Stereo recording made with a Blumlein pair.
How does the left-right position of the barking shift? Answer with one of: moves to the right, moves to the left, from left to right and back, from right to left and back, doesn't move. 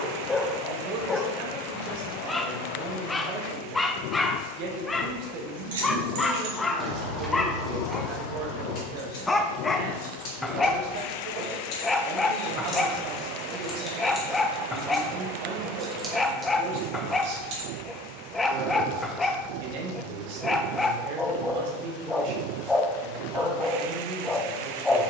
doesn't move.